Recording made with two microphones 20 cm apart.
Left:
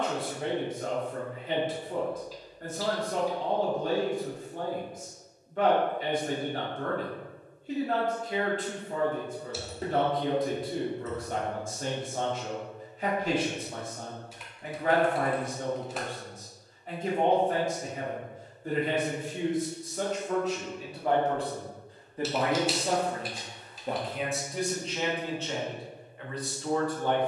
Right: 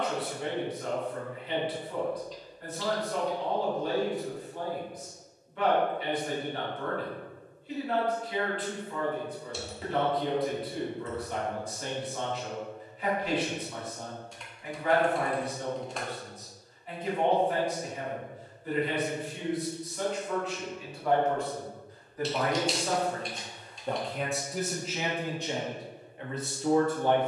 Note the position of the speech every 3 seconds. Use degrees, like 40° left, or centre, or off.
40° left, 40° left, 40° left, 40° left, 40° left, 40° left, 40° left, 20° left, 10° right.